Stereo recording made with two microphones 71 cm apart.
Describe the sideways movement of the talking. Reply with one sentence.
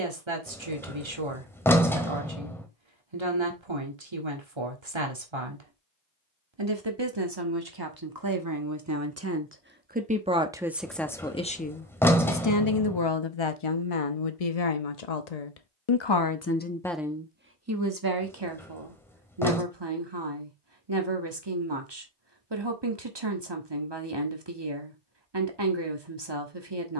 In this clip you hear the talking go left and come back.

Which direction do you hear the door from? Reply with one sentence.
You can hear the door in the centre.